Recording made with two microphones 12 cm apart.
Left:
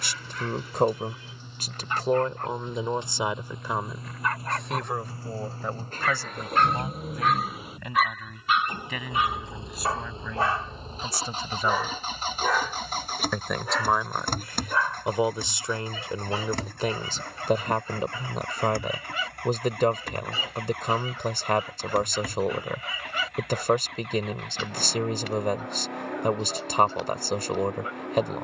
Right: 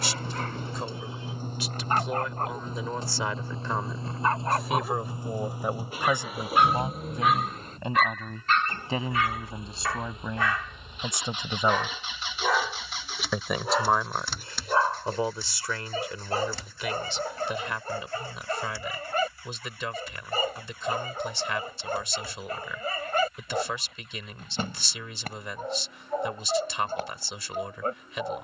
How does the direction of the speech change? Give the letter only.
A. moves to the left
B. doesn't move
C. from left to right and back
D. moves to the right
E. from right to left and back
C.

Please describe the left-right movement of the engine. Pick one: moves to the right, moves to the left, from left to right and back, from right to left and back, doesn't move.
moves to the left.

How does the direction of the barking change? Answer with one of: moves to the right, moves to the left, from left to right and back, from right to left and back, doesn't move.
from right to left and back.